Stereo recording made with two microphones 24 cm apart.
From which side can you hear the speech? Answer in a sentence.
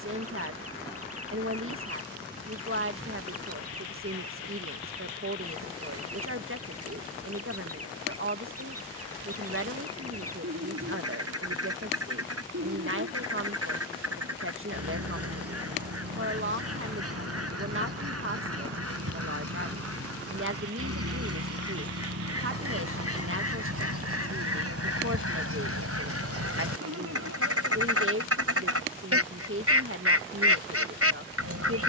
In this clip you hear the speech on the right.